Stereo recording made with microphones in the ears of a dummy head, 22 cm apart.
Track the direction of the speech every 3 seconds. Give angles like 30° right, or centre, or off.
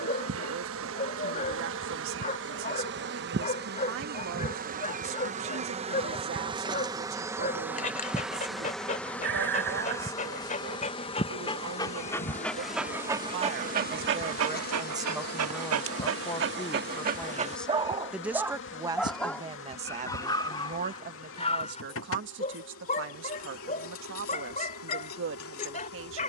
60° right, 60° right, 60° right, 60° right, 40° right, 10° left, 20° right, 50° right, 60° right.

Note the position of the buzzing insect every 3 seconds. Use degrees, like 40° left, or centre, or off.
50° right, 40° right, 10° right, 20° left, 40° left, 50° left, 50° left, 60° left, 60° left.